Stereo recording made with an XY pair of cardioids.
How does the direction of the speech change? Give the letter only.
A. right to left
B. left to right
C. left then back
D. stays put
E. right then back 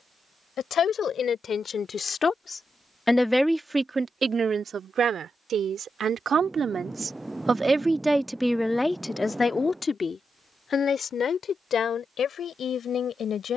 E.